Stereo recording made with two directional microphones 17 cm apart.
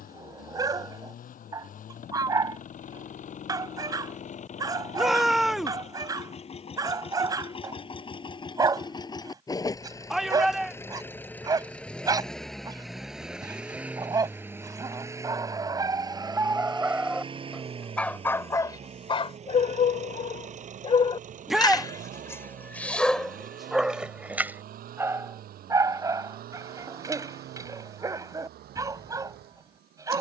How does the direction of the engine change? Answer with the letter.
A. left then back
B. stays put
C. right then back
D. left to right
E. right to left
D.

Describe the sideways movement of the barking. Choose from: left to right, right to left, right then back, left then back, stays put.
left then back.